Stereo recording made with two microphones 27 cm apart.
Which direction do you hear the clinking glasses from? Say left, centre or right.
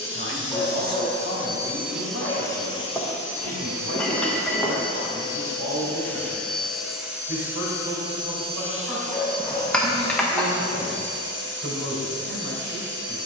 centre.